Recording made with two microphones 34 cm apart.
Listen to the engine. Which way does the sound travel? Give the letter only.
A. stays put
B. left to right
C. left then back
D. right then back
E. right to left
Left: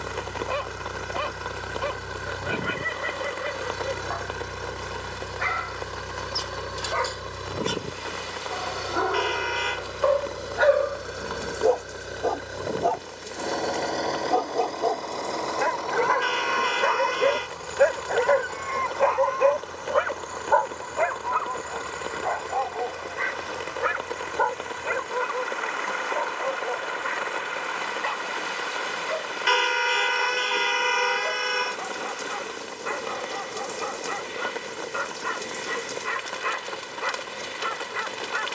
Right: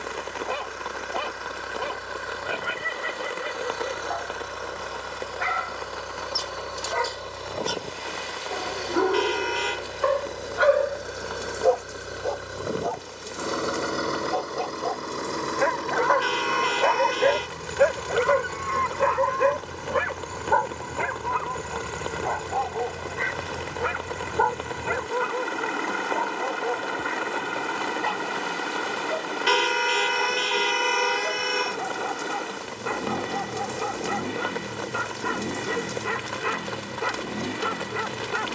B.